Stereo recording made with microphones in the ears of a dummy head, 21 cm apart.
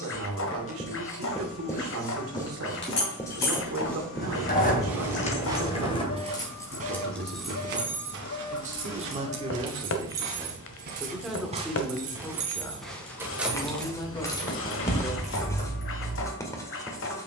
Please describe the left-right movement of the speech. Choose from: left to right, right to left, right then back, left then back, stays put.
right to left.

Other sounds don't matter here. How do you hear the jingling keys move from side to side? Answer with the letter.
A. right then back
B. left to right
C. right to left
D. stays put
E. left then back
A.